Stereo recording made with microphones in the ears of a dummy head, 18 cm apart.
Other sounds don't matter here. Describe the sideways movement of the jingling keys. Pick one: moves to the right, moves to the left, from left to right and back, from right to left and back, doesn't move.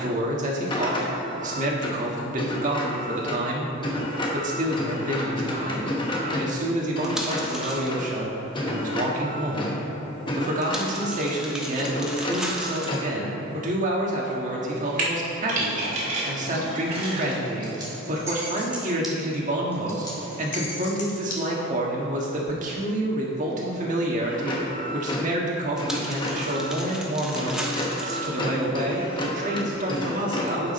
moves to the left.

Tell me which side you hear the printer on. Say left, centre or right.
left.